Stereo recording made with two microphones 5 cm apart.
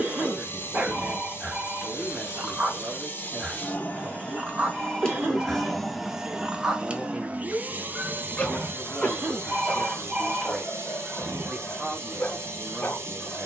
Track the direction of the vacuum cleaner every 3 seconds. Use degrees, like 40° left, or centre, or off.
50° left, 20° left, 30° right, 60° right, 70° right.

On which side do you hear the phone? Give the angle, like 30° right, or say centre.
30° right.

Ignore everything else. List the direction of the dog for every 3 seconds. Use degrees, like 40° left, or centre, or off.
30° right, 30° right, centre, 30° left, 40° left.